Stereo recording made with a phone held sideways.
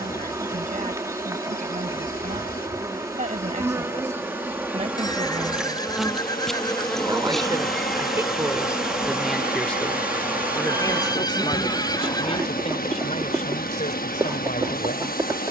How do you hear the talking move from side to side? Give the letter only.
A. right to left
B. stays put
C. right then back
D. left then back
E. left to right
A.